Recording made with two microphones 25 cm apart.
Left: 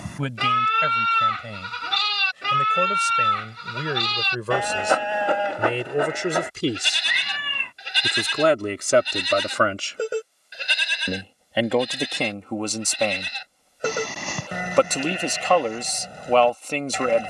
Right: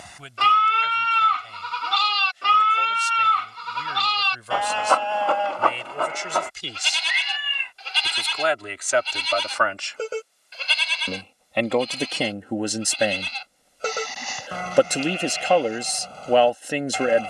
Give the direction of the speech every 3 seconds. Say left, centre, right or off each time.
left, left, left, left, centre, centre.